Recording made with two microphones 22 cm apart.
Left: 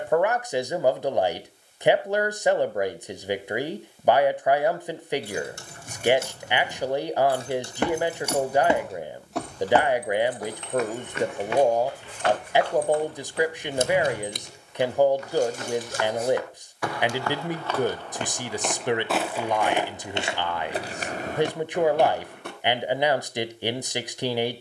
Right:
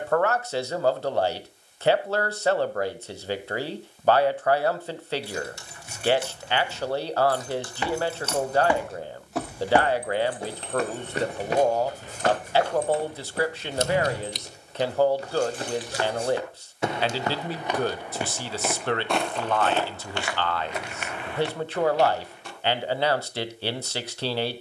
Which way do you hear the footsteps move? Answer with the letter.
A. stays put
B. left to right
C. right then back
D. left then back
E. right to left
C.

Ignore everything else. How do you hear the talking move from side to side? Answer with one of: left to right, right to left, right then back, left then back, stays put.
stays put.